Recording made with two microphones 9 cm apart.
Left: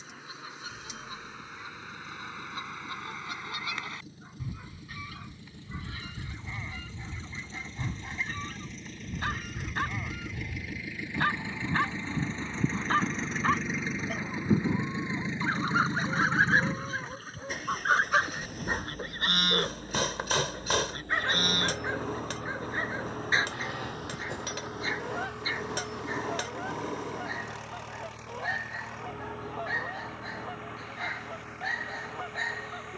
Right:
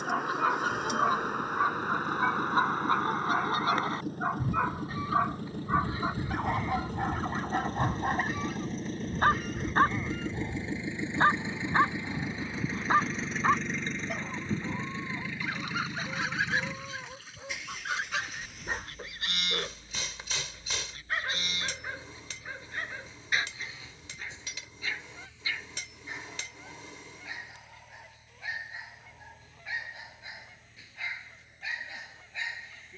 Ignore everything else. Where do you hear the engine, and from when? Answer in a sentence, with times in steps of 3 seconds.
In this clip you hear the engine on the right from 0 s, in the centre from 12 s and on the left from 15 s.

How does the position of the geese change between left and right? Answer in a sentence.
In this clip you hear the geese move from right to left.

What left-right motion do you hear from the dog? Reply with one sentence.
You can hear the dog travel towards the left.